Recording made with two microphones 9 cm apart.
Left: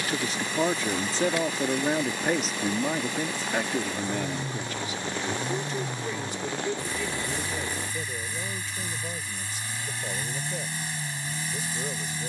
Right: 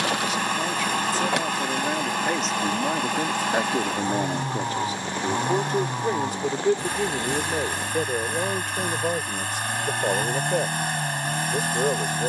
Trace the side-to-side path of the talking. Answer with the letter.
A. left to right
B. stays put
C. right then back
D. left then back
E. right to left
A.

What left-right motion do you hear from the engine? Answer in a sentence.
You can hear the engine stay in one place.